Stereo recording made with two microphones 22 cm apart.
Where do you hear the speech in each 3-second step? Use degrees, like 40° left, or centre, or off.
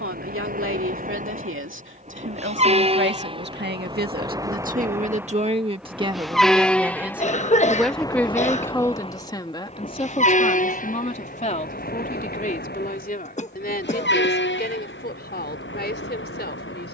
70° right, 40° right, centre, 30° left, 40° left, 50° left.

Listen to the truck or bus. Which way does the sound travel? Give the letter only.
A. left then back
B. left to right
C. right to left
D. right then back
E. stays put
C.